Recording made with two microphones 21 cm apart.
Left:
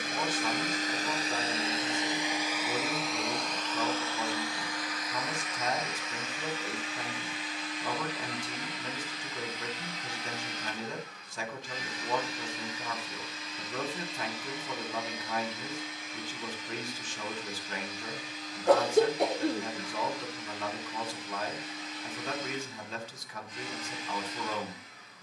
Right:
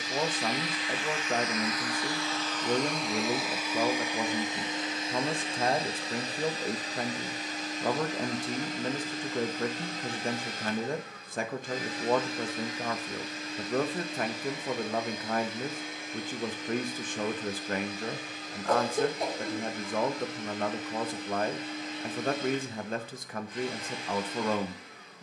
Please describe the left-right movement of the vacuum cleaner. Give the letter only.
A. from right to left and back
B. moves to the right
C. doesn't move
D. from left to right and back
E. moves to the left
B.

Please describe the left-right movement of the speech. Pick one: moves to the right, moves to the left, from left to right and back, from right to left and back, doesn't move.
doesn't move.